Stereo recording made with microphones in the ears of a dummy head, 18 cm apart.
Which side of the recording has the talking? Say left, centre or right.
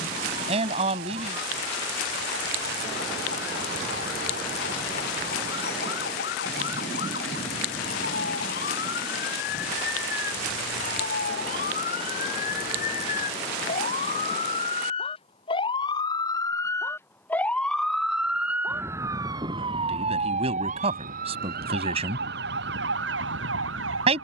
right.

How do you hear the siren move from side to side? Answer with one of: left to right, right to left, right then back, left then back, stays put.
left to right.